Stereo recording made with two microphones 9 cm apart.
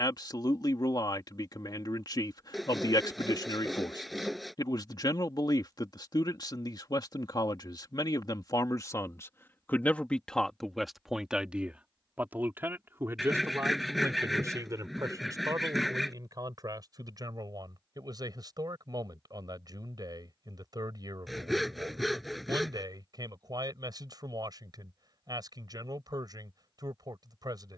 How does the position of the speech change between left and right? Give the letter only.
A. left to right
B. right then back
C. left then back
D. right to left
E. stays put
A.